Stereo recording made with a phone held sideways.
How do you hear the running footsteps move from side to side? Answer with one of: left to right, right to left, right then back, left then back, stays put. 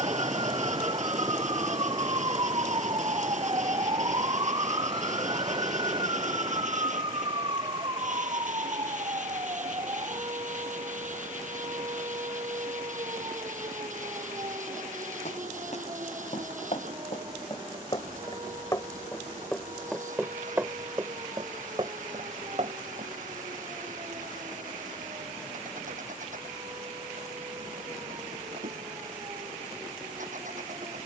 left to right.